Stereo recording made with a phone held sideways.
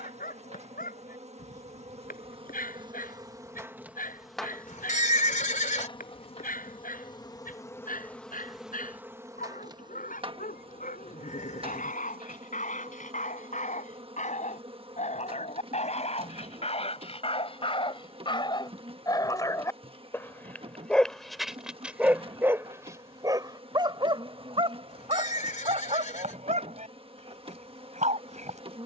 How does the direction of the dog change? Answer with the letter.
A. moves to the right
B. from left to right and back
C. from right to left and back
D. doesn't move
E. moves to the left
A.